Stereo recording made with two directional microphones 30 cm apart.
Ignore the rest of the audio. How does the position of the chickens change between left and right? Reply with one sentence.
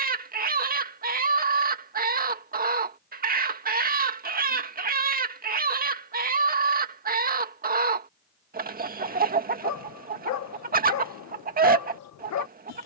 In this clip you hear the chickens stay in one place.